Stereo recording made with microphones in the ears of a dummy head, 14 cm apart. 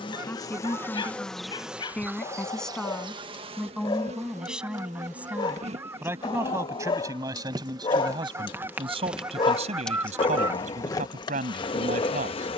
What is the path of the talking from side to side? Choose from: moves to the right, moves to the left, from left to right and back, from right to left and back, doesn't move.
moves to the right.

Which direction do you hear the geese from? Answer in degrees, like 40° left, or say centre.
10° right.